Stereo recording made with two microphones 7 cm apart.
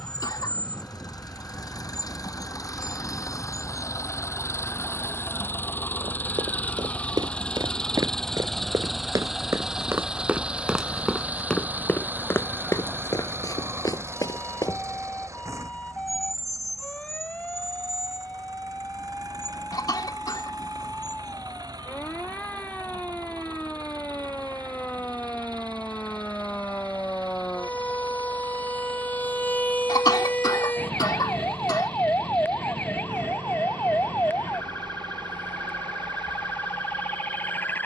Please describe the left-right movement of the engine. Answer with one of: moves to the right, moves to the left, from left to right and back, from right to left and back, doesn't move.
moves to the right.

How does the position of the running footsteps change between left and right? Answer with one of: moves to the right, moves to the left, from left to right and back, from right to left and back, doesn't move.
moves to the left.